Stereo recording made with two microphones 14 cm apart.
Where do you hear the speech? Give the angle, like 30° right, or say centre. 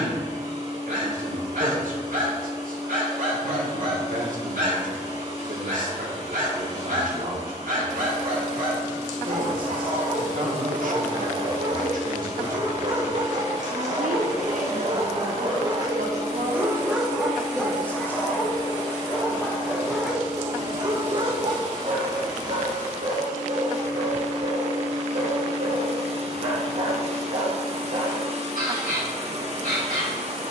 70° right.